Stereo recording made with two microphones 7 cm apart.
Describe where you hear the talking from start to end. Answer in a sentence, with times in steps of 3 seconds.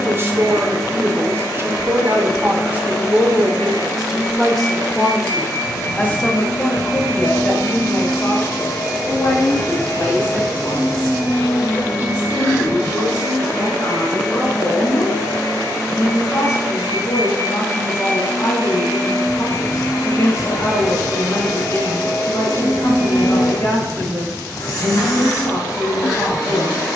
You can hear the talking on the right from 0 s, in the centre from 3 s and on the left from 6 s.